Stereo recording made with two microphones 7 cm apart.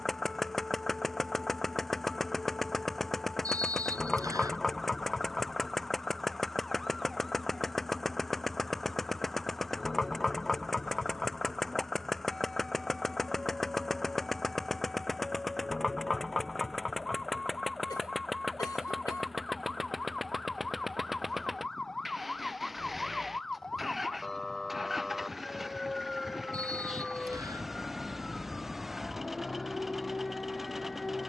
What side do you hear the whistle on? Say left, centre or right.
right.